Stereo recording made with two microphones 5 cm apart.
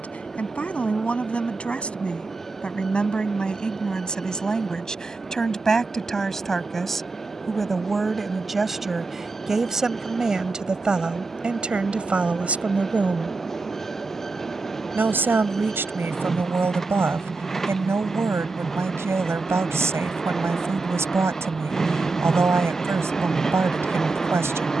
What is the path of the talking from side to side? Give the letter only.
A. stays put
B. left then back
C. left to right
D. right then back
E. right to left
C.